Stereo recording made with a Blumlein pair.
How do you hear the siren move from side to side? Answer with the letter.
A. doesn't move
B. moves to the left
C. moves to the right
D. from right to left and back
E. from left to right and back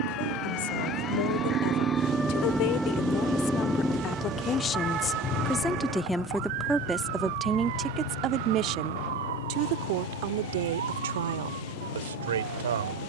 C.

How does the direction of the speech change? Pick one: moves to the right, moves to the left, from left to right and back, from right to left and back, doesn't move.
moves to the right.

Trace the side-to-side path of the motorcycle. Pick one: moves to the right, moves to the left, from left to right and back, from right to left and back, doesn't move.
moves to the left.